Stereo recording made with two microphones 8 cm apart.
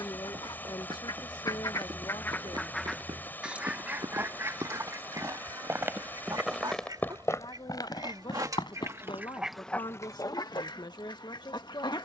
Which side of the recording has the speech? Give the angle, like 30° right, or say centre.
60° left.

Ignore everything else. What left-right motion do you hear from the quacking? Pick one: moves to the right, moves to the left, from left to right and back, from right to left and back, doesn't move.
from left to right and back.